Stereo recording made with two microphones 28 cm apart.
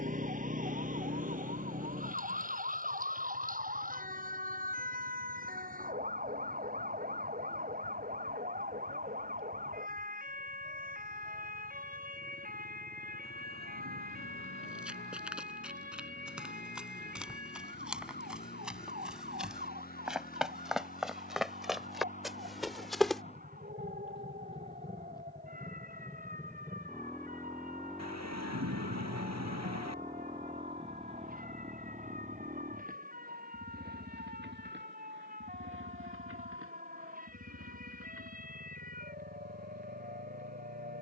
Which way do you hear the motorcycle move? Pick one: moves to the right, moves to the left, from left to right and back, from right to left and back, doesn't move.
moves to the right.